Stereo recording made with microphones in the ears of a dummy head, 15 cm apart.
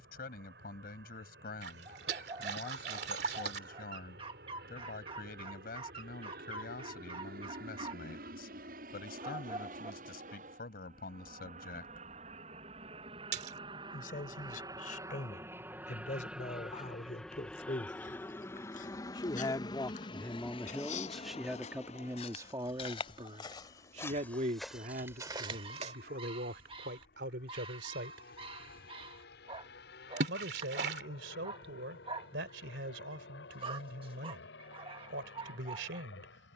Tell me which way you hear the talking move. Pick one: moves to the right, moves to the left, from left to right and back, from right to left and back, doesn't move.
moves to the right.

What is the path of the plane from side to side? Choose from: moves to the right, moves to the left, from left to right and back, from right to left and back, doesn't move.
moves to the left.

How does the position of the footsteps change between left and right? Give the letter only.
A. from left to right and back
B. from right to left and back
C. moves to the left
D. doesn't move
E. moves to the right
E.